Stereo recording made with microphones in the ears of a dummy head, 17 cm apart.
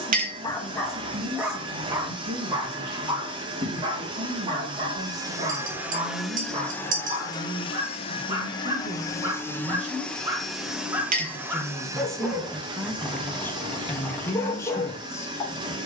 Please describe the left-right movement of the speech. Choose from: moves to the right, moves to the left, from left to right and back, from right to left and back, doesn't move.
moves to the left.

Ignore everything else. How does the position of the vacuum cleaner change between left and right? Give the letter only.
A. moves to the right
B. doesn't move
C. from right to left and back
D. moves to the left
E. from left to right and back
C.